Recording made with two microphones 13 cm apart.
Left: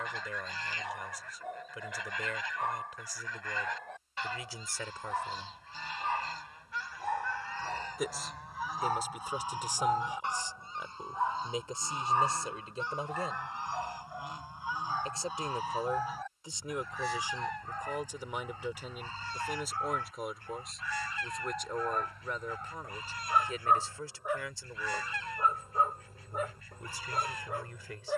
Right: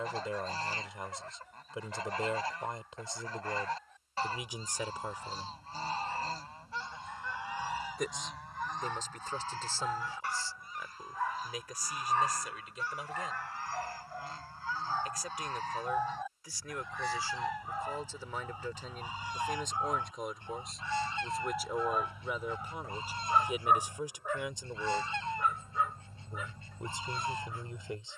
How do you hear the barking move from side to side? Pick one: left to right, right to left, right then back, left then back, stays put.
right then back.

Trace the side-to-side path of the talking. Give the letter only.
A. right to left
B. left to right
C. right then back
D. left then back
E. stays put
D.